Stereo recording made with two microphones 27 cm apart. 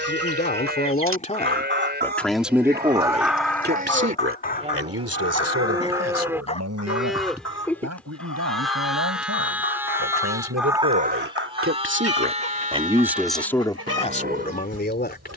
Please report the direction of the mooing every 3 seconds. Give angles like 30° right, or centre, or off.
40° right, 30° right, centre, 10° right, 30° right.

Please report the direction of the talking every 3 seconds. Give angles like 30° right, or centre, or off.
20° left, 50° right, 80° right, 70° right, 10° left.